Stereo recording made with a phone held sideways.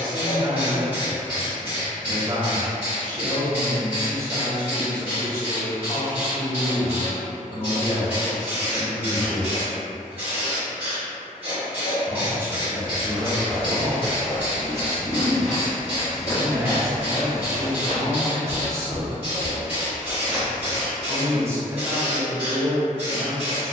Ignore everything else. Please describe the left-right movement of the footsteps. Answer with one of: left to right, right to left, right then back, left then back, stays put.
left then back.